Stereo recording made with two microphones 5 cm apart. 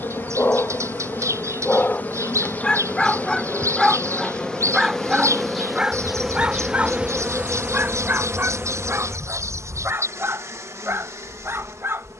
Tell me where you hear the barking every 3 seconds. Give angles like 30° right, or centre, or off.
30° left, 10° right, 40° right, 60° right.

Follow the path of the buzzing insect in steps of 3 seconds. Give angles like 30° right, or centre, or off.
40° left, 10° left, 30° right, 70° right.